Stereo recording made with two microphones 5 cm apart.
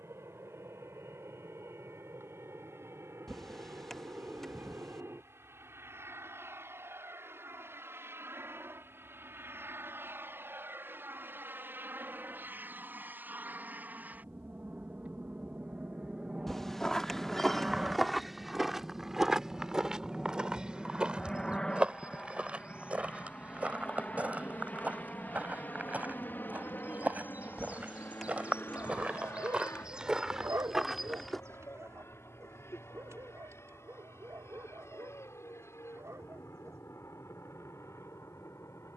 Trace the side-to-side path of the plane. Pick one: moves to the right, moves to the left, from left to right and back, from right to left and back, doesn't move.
moves to the left.